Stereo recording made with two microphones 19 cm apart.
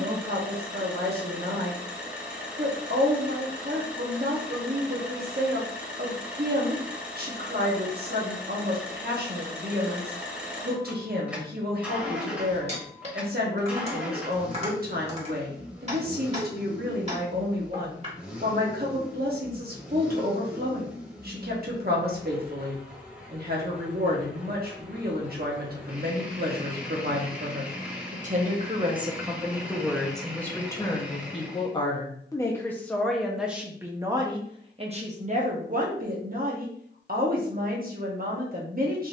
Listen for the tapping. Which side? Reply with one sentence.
You can hear the tapping on the right.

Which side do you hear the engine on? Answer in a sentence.
In this clip you hear the engine in the centre.